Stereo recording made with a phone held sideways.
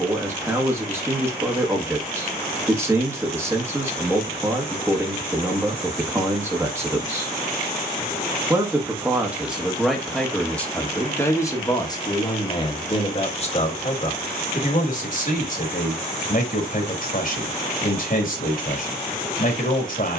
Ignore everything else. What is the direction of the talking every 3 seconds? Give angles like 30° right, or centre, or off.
20° right, 20° right, 20° right, 10° left, 40° left, 60° left, 60° left.